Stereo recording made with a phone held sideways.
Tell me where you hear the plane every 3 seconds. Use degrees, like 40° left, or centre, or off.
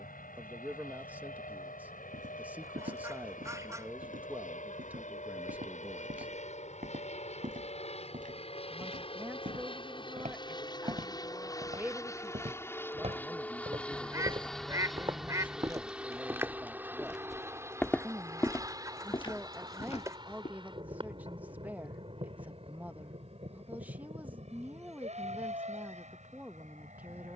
70° left, 60° left, 50° left, 30° left, 10° left, 10° right, 20° right, 40° right, 40° right.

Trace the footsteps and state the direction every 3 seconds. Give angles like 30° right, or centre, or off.
60° right, 60° right, 60° right, 50° right, 40° right, 10° right, 30° left, off, off.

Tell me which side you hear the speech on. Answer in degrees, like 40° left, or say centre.
10° right.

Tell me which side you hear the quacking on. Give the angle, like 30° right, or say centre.
20° right.